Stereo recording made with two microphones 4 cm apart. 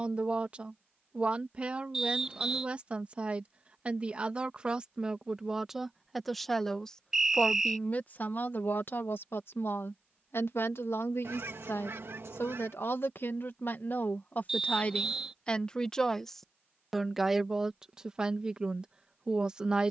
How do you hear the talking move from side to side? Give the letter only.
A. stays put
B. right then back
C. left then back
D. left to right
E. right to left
C.